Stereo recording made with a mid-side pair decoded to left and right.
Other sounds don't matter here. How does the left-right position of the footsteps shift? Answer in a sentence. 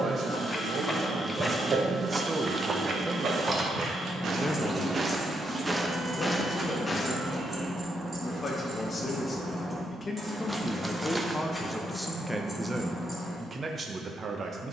You can hear the footsteps move from left to right and back again.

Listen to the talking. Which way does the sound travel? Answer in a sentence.
In this clip you hear the talking move from right to left and back again.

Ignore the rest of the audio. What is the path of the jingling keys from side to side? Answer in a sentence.
You can hear the jingling keys move from left to right and back again.